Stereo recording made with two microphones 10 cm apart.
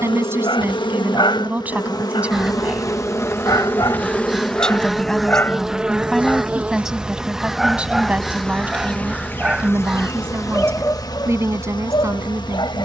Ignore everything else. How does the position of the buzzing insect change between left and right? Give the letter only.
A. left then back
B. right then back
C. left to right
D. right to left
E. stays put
B.